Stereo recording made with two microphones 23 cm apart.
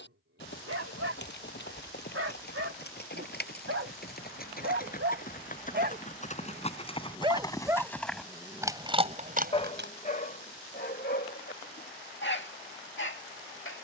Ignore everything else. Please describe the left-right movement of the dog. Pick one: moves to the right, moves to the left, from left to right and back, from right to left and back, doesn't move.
moves to the left.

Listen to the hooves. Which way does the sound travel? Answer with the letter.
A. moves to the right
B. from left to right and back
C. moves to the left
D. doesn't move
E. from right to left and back
A.